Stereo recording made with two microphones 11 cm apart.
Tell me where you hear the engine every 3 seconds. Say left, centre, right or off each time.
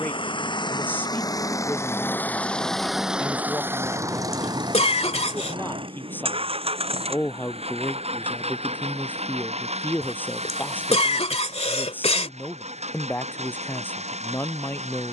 left, right, right, right, right.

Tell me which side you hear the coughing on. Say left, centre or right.
left.